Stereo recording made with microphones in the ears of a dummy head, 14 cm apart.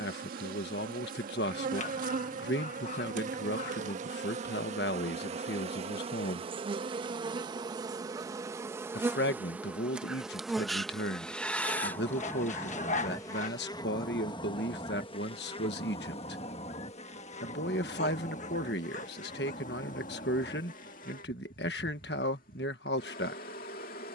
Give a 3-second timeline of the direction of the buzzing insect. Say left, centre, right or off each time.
right, right, right, centre, left, left, left, left.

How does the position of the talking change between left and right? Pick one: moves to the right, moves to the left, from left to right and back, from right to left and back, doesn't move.
doesn't move.